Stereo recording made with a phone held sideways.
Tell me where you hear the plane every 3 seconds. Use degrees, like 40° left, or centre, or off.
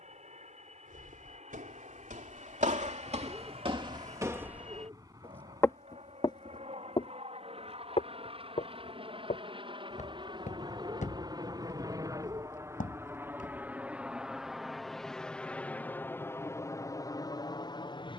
60° right, 50° right, 50° right, 40° right, 10° right, 20° left.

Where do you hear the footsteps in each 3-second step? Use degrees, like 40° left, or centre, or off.
70° right, 30° right, 40° left, 60° left, 60° left, off.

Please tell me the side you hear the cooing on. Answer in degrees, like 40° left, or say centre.
20° right.